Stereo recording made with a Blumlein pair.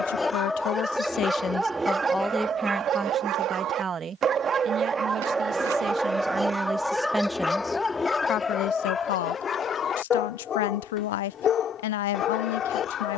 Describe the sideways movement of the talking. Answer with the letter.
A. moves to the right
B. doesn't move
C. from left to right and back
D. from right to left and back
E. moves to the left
C.